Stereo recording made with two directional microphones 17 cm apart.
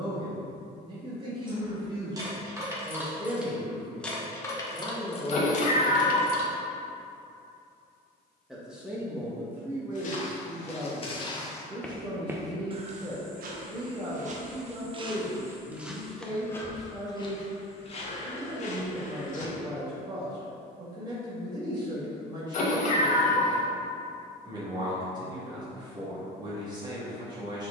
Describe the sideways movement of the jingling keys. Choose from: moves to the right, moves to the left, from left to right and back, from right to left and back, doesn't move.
moves to the left.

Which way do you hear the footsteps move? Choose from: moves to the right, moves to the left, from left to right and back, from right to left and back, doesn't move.
from left to right and back.